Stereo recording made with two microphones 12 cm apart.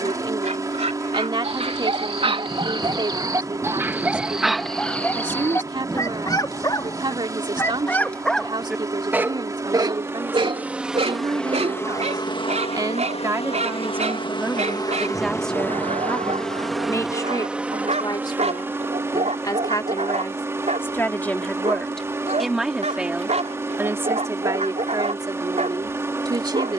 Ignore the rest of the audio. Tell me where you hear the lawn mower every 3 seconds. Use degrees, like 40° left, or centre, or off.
30° right, 30° right, 30° right, 10° right, 50° left, 10° left, 20° right, 20° right, 20° right.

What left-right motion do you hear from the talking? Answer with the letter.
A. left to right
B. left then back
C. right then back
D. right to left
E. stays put
B.